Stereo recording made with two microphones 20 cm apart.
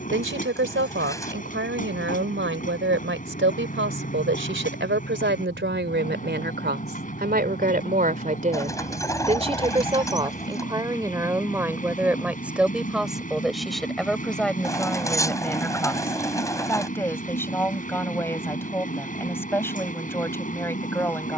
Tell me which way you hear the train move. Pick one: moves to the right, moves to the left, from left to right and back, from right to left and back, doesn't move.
doesn't move.